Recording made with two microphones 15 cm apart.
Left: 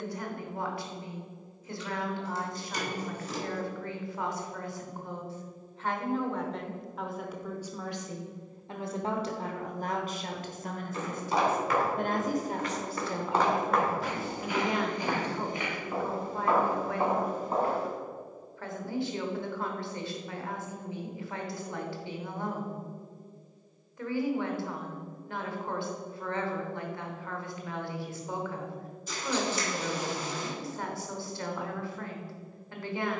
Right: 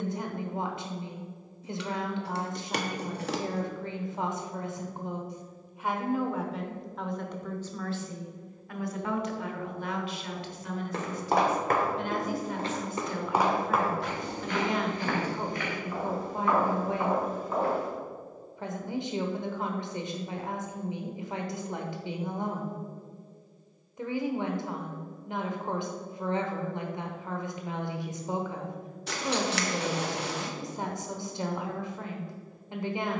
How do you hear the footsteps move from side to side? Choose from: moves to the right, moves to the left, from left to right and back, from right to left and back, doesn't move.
moves to the left.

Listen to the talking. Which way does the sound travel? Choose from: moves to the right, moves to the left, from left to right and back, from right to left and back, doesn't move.
from right to left and back.